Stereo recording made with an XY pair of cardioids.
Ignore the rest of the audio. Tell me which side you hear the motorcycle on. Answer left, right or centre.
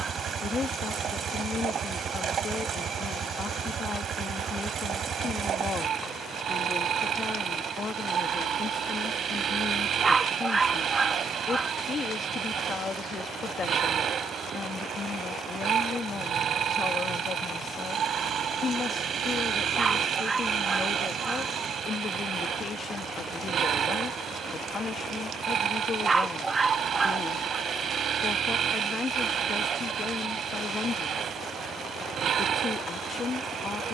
right.